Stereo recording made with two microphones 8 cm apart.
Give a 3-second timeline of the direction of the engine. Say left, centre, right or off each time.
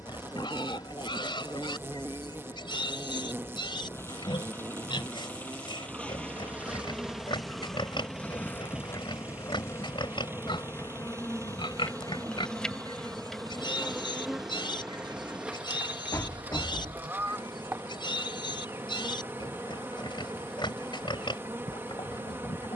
left, left, centre, right, right, right, right, right.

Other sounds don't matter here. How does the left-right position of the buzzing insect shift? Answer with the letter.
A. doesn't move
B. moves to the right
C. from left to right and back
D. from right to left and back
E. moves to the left
D.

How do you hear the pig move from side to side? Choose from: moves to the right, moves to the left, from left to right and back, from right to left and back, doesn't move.
doesn't move.